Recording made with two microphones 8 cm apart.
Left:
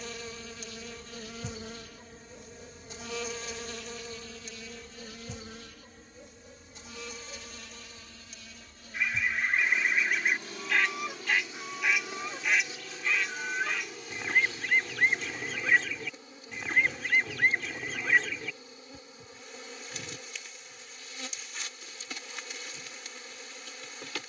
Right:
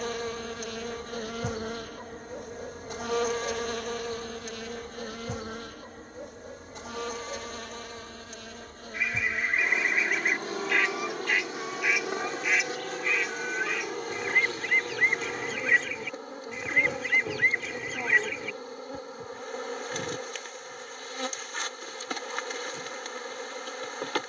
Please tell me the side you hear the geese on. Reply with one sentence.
You can hear the geese in the centre.